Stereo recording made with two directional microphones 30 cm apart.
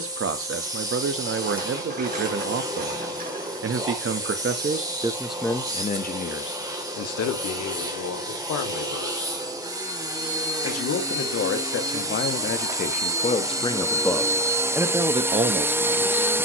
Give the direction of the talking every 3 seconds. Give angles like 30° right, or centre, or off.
40° right, 20° right, 50° left, 50° left, 20° left, 20° right.